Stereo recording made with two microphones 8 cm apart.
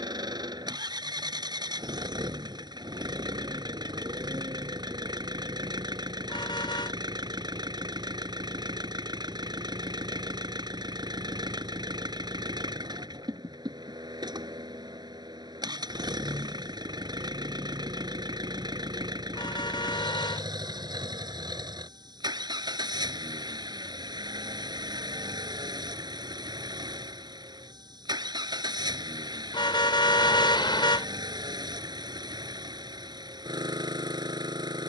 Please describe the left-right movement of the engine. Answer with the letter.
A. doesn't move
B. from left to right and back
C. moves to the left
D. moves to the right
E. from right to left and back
A.